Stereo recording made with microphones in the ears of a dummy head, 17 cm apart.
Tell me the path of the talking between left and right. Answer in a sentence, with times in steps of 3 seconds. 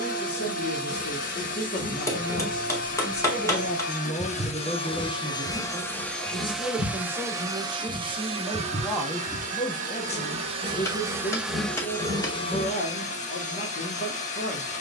You can hear the talking on the left from 0 s, in the centre from 3 s, on the right from 6 s and on the left from 9 s.